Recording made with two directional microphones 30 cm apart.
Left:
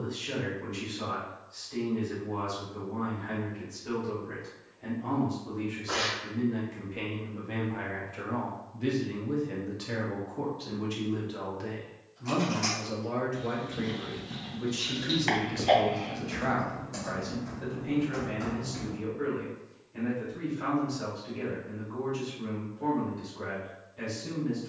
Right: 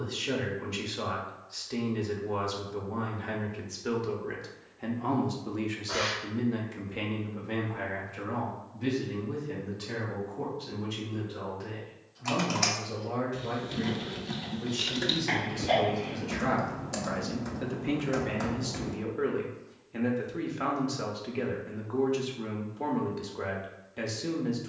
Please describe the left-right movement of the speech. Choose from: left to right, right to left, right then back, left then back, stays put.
left then back.